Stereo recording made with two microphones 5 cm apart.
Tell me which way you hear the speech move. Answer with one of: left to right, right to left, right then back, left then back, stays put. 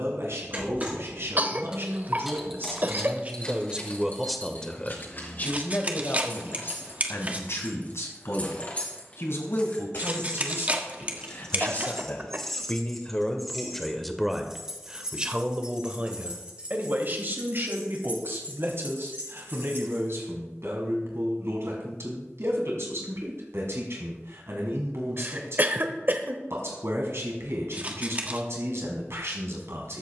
left then back.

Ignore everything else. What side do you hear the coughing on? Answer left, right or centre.
right.